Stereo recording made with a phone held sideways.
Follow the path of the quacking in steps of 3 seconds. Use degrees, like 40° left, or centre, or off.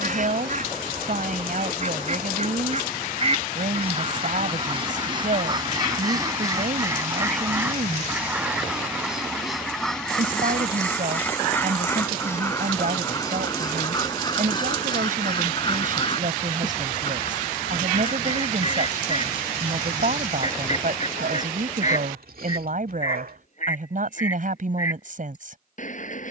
50° right, 30° right, 10° right, 10° left, 20° left, 30° left, 40° left, 50° left, 50° left.